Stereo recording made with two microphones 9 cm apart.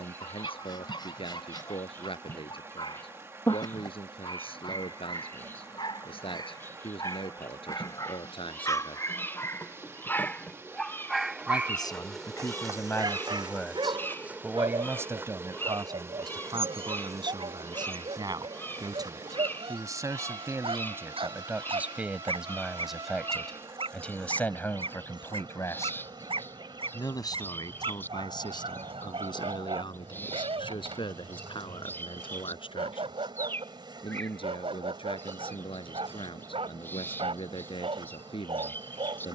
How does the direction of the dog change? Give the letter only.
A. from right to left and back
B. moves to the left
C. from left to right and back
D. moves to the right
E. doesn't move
D.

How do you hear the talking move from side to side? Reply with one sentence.
You can hear the talking move from left to right and back again.